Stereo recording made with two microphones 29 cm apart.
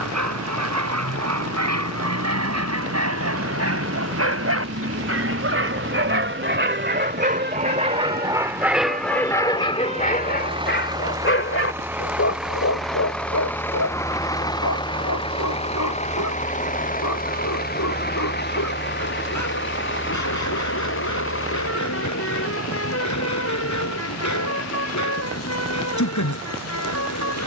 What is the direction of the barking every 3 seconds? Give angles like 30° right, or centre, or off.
70° right, 60° right, 30° right, 30° left, 60° left, 80° left, 80° left, 80° left, 80° left.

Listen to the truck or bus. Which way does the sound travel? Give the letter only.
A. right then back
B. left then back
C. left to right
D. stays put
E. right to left
E.